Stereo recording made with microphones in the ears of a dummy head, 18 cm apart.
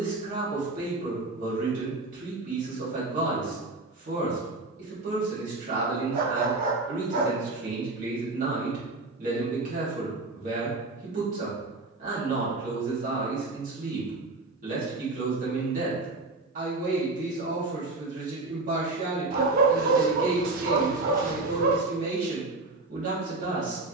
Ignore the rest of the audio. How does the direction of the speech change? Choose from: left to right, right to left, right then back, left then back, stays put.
stays put.